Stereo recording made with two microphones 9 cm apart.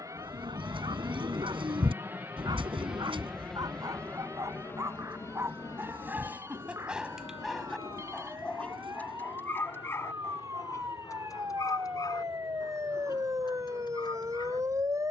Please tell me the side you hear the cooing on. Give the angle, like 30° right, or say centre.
70° right.